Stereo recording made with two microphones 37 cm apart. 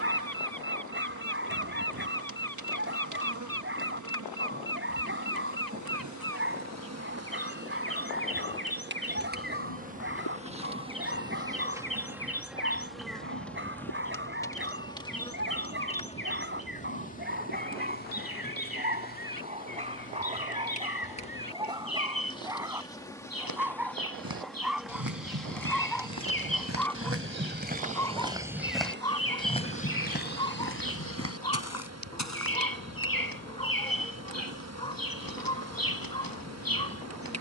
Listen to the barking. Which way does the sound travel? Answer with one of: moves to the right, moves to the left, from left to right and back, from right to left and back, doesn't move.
moves to the left.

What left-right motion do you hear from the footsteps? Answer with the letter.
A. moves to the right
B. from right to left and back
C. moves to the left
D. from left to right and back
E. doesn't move
C.